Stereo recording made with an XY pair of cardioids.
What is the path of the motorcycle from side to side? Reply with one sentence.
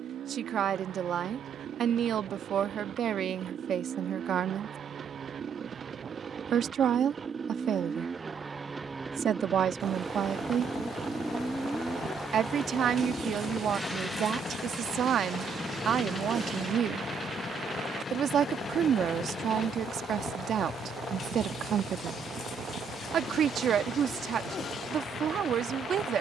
In this clip you hear the motorcycle move to the left.